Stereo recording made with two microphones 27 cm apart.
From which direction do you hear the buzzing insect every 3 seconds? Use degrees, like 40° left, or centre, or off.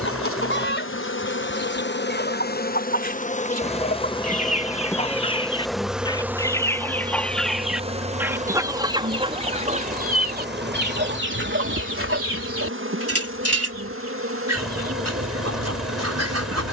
40° left, 10° left, 20° right, 40° right, 50° right, 60° right.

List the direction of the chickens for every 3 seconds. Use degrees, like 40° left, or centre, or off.
40° left, 30° left, centre, 40° right, 60° right, 70° right.